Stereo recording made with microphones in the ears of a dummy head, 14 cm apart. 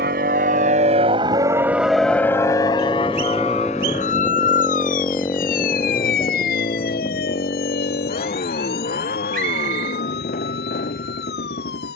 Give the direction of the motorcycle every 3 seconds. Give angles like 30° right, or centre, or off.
20° right, 10° left, 40° left, 60° left.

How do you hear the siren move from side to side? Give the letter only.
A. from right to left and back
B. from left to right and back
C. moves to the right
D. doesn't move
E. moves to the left
E.